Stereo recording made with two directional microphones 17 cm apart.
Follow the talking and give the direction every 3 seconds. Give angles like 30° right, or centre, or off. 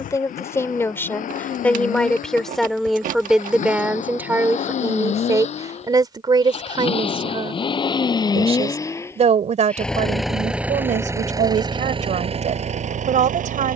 10° left, 10° right, 30° right, 50° right, 50° right.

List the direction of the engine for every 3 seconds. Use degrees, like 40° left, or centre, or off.
50° left, 50° left, 30° left, 10° right, 50° right.